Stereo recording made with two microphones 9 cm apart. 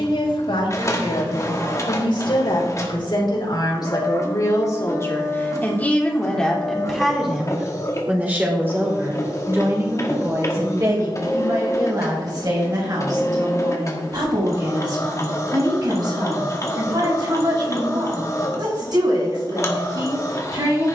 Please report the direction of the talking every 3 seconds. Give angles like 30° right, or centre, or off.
70° left, 40° left, 10° right, 40° right, 50° right, 50° right, 50° right.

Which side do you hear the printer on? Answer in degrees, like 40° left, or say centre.
30° left.